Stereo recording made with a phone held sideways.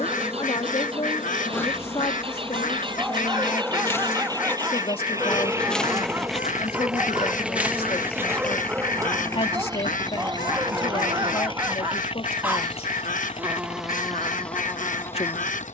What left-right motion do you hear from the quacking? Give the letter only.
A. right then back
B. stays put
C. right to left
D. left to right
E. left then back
B.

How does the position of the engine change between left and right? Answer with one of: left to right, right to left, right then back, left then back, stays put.
right to left.